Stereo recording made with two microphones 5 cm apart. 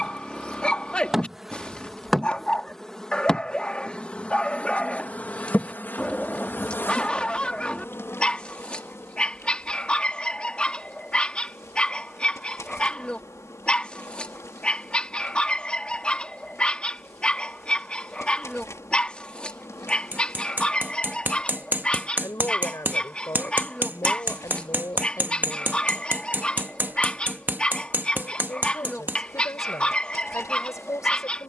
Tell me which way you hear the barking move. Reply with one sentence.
In this clip you hear the barking stay in one place.